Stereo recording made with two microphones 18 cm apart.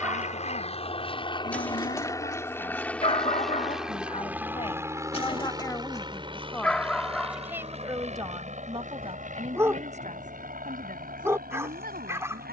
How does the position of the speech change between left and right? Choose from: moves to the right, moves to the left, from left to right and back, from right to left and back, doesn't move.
moves to the right.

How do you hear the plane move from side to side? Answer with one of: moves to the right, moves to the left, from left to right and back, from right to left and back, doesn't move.
moves to the right.